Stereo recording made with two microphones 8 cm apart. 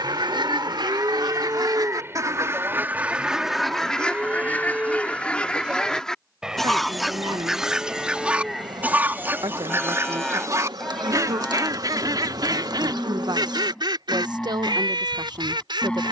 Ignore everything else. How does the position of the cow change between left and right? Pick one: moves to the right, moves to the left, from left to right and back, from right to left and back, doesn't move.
moves to the left.